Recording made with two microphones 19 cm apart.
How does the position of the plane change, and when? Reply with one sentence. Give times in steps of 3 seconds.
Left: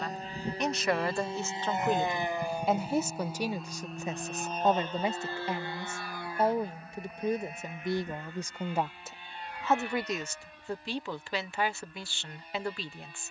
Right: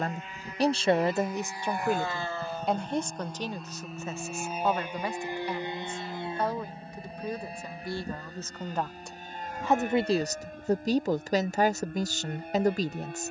In this clip you hear the plane on the left from 0 s, in the centre from 3 s and on the right from 6 s.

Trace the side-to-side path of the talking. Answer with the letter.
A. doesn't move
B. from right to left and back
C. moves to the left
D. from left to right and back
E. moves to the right
B.